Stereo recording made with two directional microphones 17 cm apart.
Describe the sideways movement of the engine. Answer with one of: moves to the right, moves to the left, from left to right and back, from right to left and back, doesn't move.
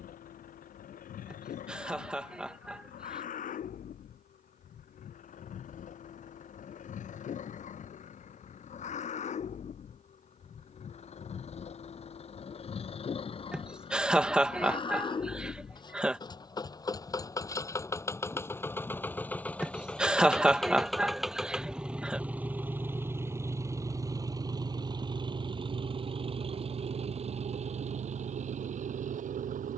moves to the right.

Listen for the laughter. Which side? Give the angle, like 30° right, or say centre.
10° right.